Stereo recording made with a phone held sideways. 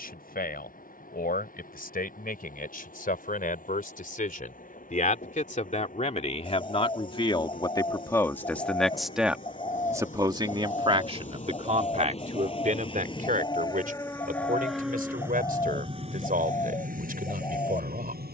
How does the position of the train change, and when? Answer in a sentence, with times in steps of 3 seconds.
You can hear the train on the left from 0 s and on the right from 15 s.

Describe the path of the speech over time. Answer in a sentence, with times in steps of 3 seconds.
In this clip you hear the speech on the left from 0 s and on the right from 9 s.